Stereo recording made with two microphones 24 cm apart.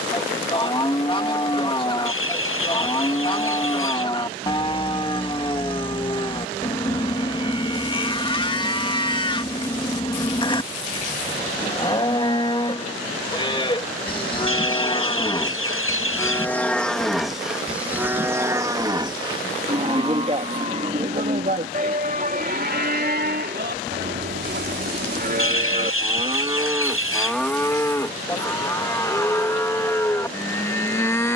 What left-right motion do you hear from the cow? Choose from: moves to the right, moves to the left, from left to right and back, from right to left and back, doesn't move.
from left to right and back.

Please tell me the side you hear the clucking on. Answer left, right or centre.
left.